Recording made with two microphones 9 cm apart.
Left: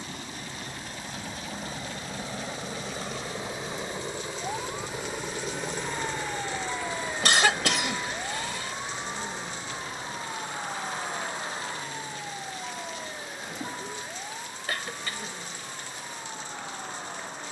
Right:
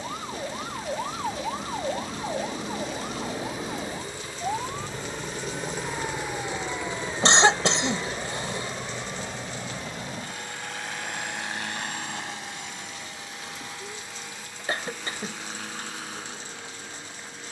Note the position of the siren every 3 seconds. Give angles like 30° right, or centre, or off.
60° right, 20° right, 20° left, 40° left, 40° left, 50° left.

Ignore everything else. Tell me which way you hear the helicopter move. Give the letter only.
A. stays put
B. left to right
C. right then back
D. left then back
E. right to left
B.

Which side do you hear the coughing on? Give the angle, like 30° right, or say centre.
30° right.